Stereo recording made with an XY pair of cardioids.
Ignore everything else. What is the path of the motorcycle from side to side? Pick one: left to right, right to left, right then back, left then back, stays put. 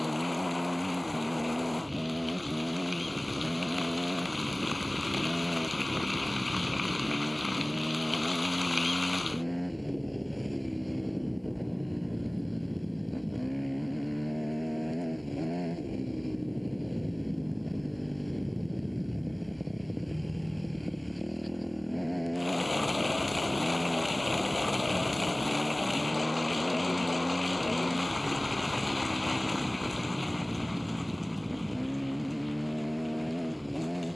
stays put.